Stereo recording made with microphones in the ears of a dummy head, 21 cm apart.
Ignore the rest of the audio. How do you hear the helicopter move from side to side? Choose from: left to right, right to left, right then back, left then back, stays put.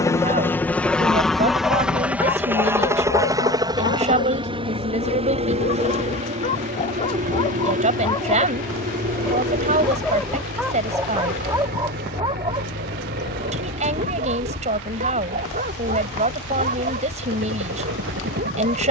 left to right.